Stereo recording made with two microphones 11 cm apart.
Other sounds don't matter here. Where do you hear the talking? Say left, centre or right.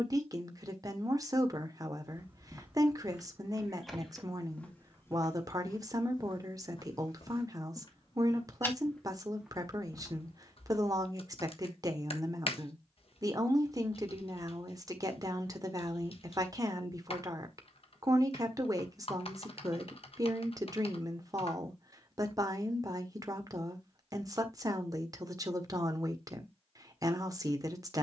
right.